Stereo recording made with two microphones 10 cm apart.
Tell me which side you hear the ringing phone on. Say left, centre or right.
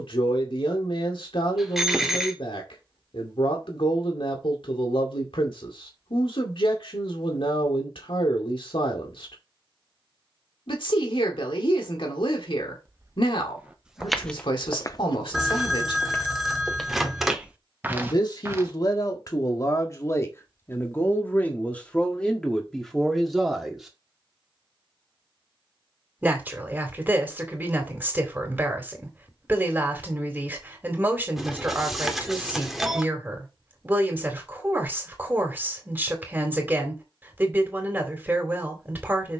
centre.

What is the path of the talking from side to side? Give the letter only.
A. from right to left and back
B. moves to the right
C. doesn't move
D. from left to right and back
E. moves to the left
B.